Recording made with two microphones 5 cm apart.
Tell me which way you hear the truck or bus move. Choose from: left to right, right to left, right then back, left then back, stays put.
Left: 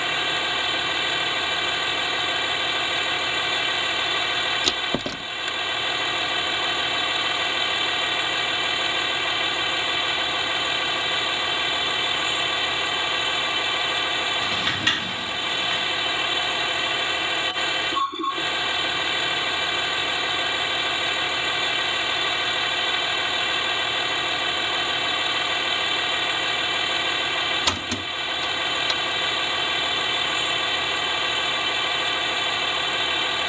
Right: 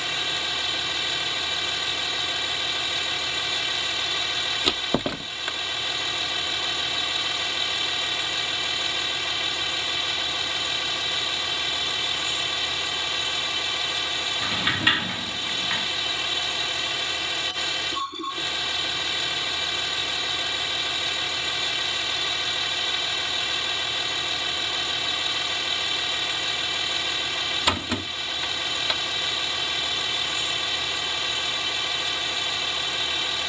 stays put.